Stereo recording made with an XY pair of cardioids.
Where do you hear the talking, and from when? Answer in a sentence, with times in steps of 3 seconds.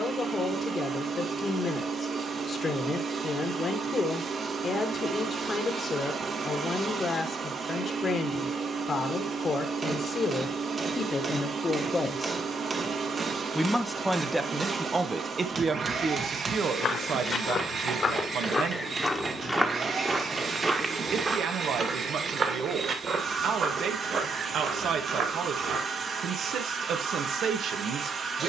In this clip you hear the talking on the left from 0 s, in the centre from 12 s and on the right from 15 s.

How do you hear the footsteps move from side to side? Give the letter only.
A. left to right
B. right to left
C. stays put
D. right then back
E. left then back
A.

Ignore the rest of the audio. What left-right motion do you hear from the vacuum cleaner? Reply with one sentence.
In this clip you hear the vacuum cleaner stay put.